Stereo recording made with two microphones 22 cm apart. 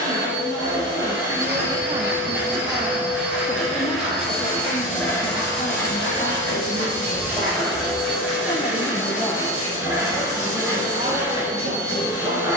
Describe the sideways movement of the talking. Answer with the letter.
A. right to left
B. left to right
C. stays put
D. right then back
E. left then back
E.